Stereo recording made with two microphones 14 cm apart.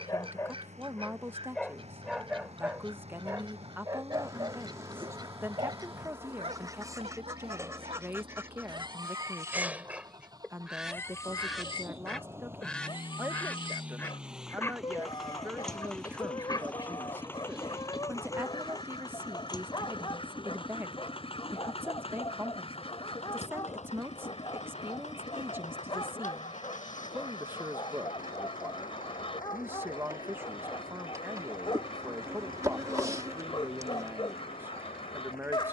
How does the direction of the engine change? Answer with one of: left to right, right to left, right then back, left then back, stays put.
right to left.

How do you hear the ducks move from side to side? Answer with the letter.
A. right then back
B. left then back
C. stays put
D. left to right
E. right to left
E.